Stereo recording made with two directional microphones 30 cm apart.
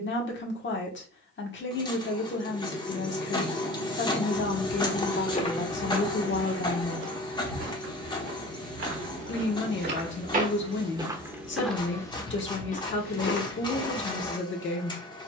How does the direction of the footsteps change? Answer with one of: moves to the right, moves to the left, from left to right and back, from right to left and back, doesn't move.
from left to right and back.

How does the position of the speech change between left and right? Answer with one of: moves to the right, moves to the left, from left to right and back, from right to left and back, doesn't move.
doesn't move.